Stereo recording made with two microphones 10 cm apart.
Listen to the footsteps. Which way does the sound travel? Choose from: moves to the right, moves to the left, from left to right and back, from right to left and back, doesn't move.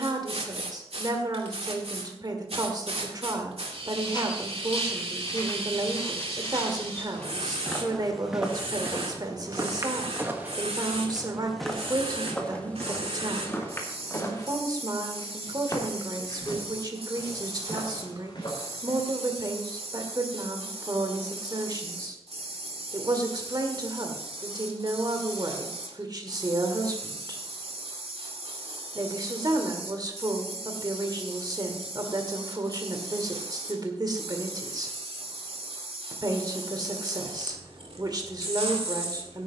from left to right and back.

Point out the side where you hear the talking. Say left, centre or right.
right.